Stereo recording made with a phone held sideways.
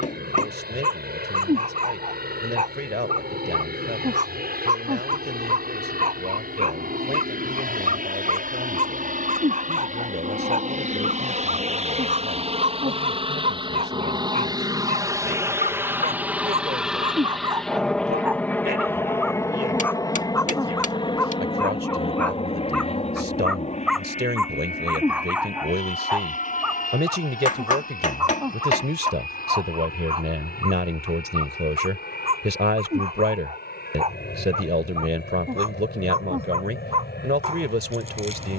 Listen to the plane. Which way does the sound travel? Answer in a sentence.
In this clip you hear the plane move to the left.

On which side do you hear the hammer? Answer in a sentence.
You can hear the hammer on the left.